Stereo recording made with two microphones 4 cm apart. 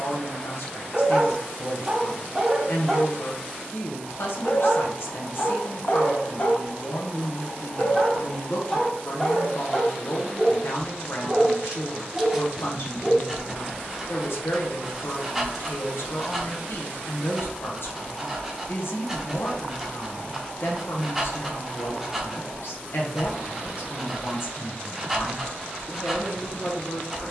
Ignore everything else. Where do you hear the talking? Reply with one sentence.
In this clip you hear the talking on the left.